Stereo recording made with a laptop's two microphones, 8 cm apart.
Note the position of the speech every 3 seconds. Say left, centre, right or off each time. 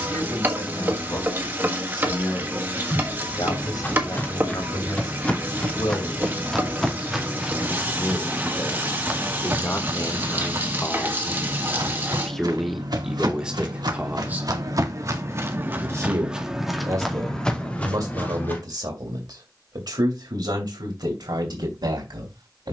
left, left, left, left, centre, right, right, right.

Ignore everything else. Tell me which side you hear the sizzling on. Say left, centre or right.
right.